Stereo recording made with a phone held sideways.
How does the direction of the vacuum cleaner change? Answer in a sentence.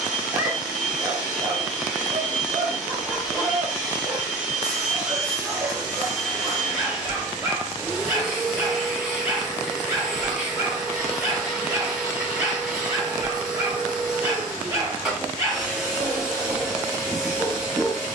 In this clip you hear the vacuum cleaner stay put.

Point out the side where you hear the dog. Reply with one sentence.
You can hear the dog on the right.